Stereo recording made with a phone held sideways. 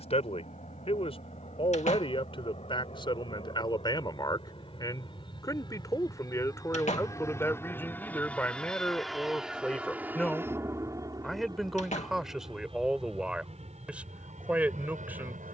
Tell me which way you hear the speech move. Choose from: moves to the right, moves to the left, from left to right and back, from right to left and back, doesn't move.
moves to the right.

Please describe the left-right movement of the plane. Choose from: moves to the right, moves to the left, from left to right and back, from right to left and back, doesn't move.
moves to the right.